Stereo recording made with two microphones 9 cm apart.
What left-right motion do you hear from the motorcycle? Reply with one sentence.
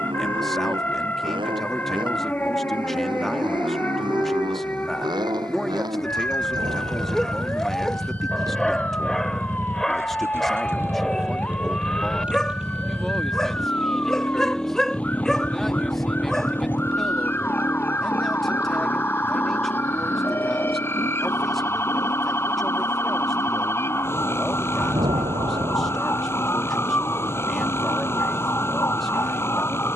In this clip you hear the motorcycle go from the right side to the left.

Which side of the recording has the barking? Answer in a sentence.
In this clip you hear the barking in the centre.